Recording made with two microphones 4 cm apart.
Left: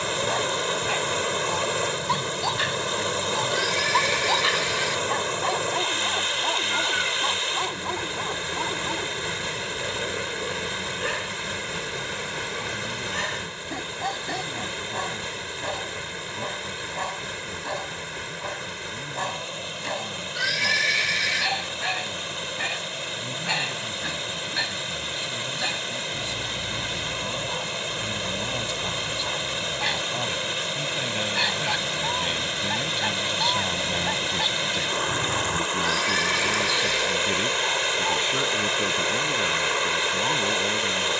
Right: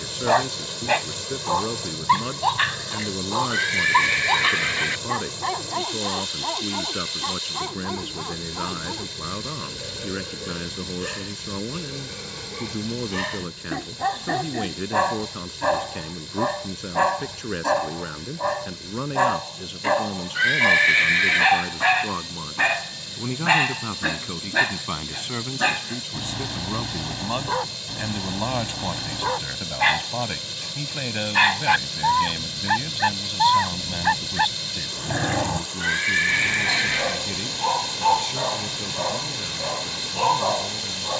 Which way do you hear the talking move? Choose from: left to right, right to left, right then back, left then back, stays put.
right to left.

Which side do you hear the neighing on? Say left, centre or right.
right.